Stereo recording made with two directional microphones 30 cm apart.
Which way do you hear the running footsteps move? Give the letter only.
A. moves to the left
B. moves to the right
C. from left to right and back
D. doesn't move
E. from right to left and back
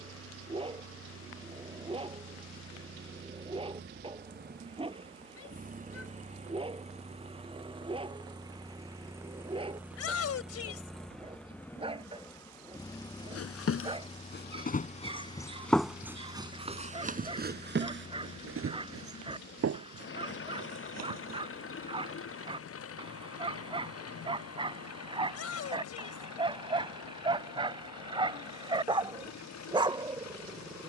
B.